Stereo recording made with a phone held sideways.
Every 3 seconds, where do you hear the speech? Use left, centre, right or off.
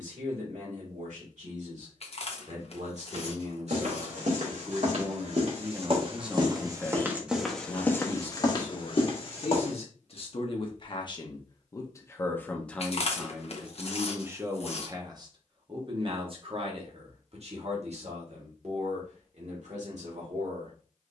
right, right, left, left, centre, right, right.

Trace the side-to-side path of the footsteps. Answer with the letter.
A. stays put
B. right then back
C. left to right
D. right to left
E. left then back
D.